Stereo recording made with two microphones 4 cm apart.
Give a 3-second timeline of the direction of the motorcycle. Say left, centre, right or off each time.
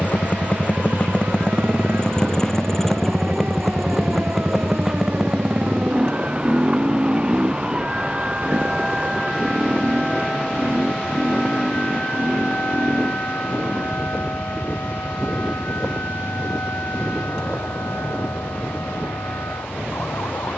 left, centre, right, right, right, right, right.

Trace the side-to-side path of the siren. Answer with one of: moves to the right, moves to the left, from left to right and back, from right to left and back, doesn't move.
moves to the left.